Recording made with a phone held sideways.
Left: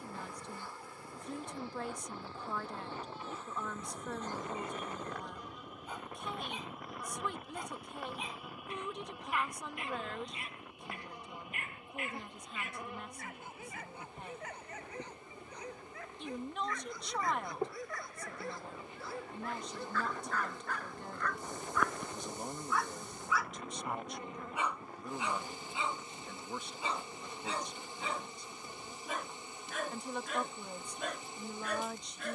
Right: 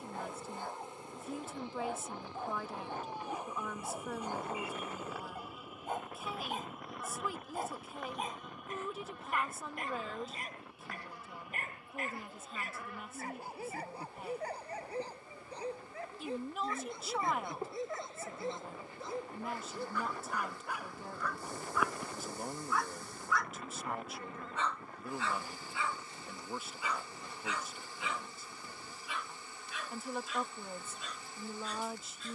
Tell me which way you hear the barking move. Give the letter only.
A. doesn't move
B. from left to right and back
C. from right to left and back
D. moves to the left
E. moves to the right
D.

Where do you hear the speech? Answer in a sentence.
You can hear the speech in the centre.